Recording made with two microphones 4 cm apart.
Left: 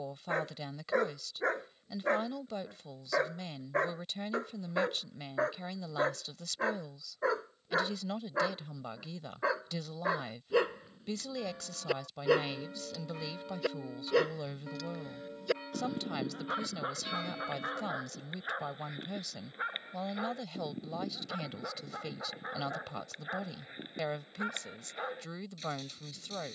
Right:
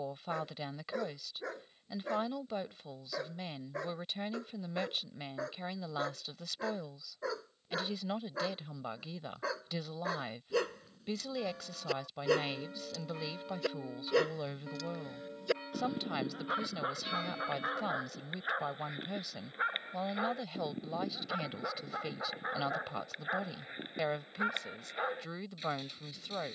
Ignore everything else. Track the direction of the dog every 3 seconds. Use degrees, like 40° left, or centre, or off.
50° left, 50° left, 30° left, 20° left, 10° left, 10° right, 10° right, 20° right, 20° right.